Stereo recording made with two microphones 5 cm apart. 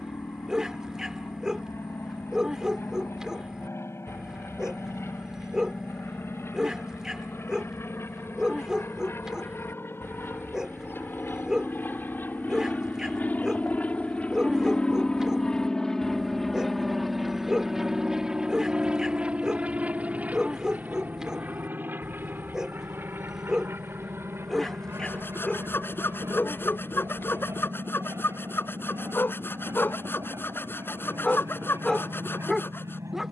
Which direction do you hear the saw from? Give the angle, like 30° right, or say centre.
50° left.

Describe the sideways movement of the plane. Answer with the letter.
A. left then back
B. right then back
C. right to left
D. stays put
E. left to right
E.